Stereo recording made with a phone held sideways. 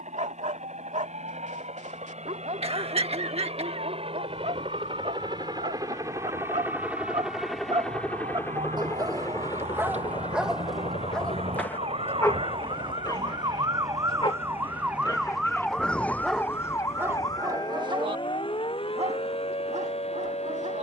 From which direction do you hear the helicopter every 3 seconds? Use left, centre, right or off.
right, right, centre, left, left, left, left.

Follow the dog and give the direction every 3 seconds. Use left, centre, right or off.
right, right, right, centre, left, centre, right.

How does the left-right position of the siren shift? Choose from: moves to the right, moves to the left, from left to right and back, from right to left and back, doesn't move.
moves to the left.